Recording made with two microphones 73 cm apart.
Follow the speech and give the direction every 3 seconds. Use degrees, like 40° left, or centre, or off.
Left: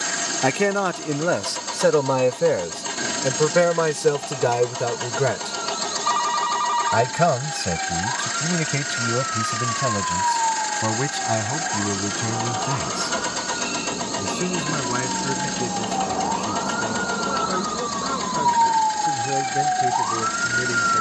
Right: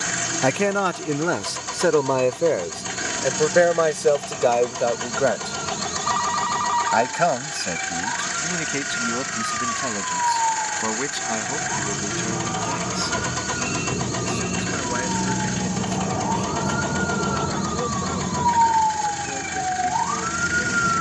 10° left, 40° left, 60° left, 70° left, 70° left, 80° left, 80° left.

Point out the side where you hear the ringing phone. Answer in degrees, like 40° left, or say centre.
60° left.